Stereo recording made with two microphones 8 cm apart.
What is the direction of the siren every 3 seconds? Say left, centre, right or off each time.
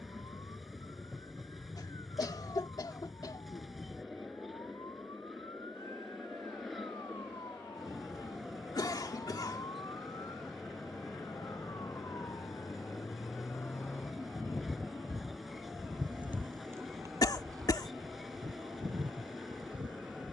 left, left, left, left, left, right, right.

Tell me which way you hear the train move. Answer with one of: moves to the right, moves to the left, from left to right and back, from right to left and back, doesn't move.
doesn't move.